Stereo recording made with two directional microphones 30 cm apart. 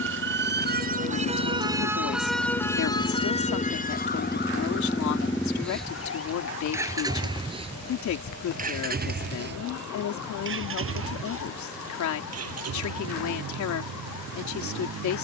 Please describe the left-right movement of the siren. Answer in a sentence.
In this clip you hear the siren move to the left.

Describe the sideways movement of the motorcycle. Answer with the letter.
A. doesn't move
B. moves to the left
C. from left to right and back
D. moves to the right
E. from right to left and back
D.